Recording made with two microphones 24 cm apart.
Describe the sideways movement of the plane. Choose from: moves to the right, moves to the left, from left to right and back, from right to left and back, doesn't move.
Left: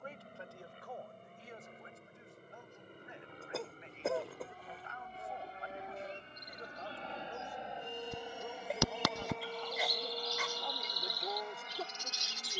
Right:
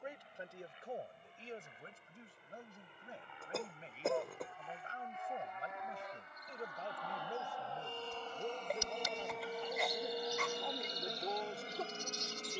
moves to the right.